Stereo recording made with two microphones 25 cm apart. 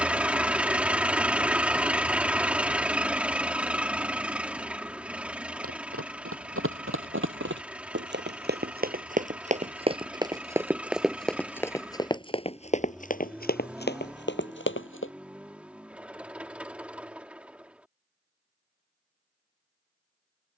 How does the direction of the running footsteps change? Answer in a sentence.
You can hear the running footsteps go from the right side to the left.